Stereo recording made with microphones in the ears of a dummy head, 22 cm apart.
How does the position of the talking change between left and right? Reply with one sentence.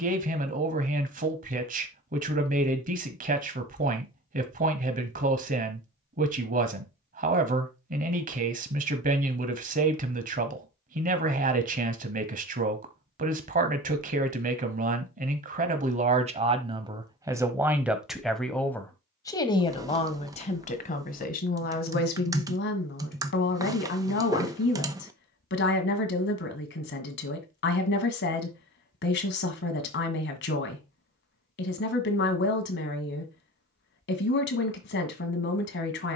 You can hear the talking move from right to left.